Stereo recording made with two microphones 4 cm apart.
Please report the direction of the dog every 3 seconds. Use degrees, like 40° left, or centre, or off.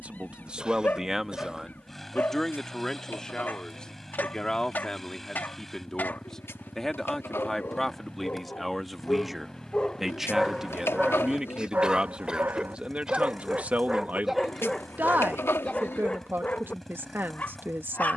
50° left, 50° left, 40° left, centre, 30° right, 30° left.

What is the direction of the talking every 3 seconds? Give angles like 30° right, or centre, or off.
10° right, 20° left, 10° left, 10° right, 30° right, 50° right.